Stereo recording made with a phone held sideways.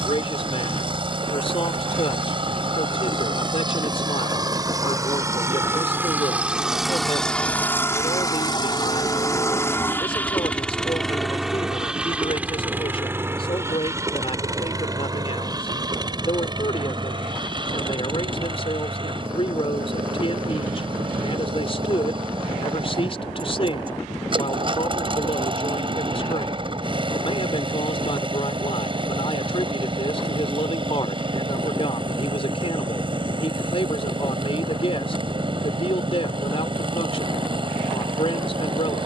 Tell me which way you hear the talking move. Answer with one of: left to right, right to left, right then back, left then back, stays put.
stays put.